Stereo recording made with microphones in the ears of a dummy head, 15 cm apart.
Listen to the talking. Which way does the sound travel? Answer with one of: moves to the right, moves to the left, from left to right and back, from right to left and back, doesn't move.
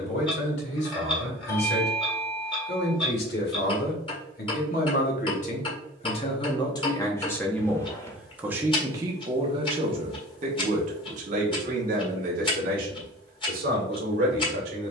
moves to the right.